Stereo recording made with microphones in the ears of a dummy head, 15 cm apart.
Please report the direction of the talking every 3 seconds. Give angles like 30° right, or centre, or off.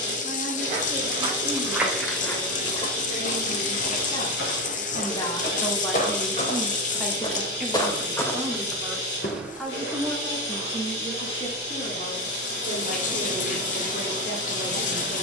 60° left, 30° left, 10° right, 20° left, 60° left.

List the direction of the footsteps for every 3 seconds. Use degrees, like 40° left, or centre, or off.
10° right, 60° left, 30° left, 20° right, off.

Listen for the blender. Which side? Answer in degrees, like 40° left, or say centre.
80° left.